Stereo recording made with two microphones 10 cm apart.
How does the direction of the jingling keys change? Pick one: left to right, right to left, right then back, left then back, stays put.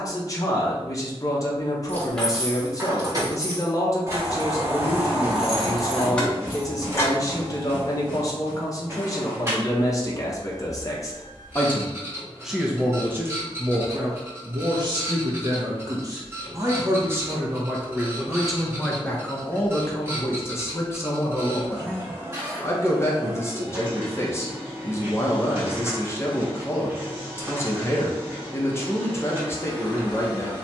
right then back.